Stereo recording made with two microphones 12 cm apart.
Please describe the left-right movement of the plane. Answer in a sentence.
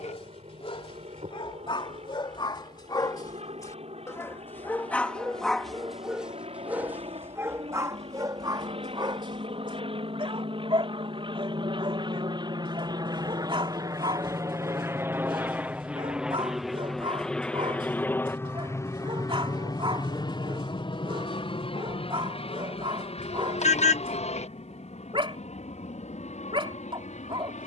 In this clip you hear the plane move to the left.